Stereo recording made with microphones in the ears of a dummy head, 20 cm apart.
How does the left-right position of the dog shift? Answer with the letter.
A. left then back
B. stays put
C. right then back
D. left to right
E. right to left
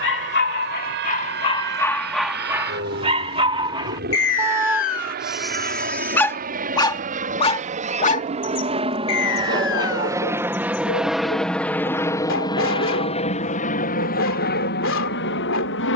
C.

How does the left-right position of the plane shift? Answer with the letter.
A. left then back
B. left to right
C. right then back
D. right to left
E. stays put
D.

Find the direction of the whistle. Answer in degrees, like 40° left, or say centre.
60° left.